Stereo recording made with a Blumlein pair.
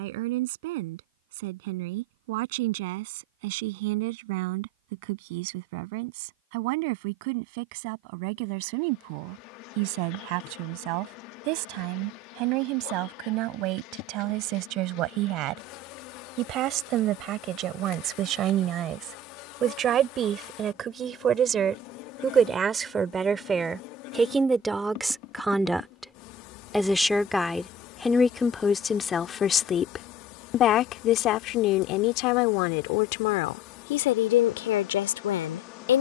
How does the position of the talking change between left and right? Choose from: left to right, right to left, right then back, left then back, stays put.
right to left.